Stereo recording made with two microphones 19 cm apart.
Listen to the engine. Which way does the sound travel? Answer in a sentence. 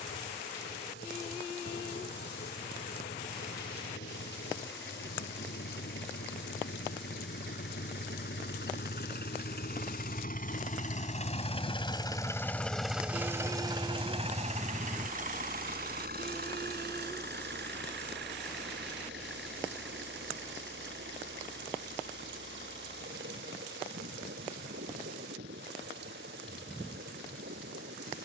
You can hear the engine move to the right.